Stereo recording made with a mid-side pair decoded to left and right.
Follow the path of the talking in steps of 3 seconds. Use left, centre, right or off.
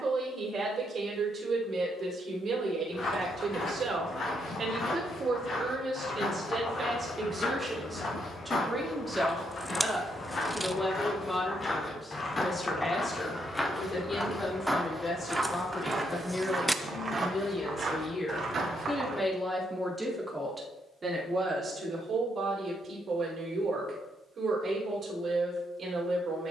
right, right, right, centre, left, left, centre, right, right.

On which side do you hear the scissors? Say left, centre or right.
centre.